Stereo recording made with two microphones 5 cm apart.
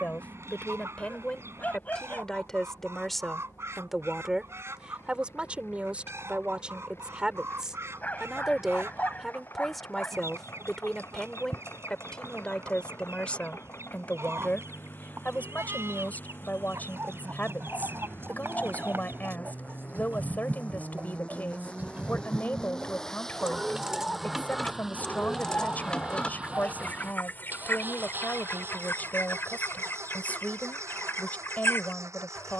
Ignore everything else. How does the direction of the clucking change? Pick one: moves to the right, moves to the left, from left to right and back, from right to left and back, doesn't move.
moves to the left.